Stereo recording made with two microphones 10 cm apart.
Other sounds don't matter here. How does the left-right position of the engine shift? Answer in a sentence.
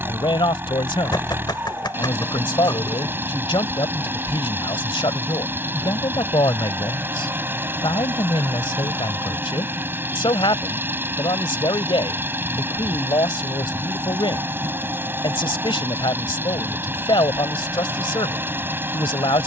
You can hear the engine stay put.